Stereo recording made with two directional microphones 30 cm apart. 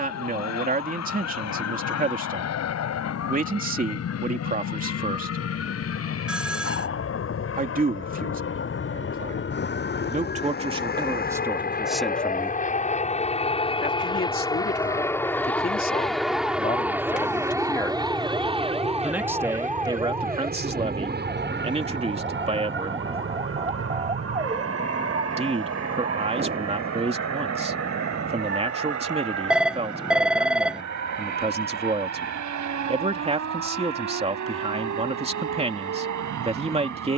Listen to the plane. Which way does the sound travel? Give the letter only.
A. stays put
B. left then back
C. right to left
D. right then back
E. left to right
E.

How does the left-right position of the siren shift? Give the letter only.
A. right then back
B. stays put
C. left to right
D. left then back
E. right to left
C.